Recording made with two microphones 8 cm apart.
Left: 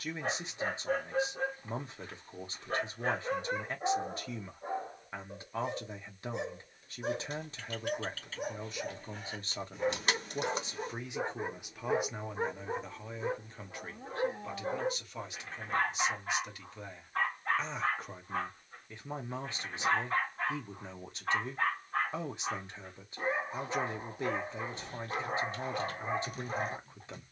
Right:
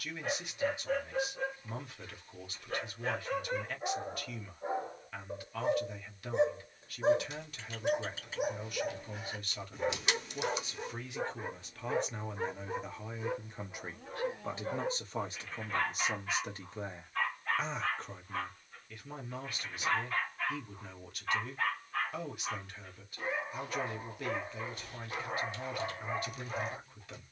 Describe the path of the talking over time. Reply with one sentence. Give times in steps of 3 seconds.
You can hear the talking on the left from 0 s, in the centre from 12 s, on the right from 15 s and on the left from 18 s.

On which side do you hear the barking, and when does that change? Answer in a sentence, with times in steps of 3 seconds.
You can hear the barking on the left from 0 s, in the centre from 3 s, on the right from 6 s, in the centre from 9 s and on the left from 12 s.